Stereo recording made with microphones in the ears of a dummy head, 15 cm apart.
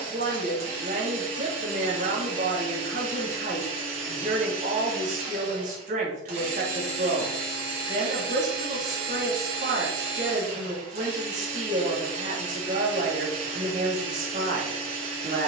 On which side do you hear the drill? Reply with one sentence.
You can hear the drill on the right.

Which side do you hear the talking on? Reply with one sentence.
You can hear the talking on the right.